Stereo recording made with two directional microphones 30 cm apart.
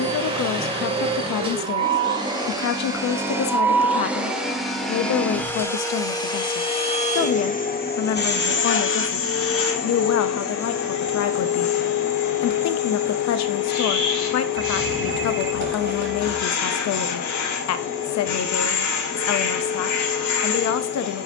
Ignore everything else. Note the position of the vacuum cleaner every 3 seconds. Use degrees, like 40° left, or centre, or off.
20° right, centre, 30° left, 60° left, 70° left, 70° left, 70° left.